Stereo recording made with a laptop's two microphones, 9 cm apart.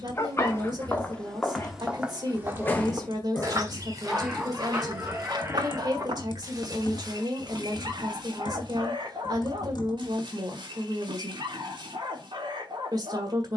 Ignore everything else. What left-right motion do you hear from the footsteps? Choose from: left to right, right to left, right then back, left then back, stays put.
left to right.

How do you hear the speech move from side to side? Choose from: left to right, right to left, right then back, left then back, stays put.
stays put.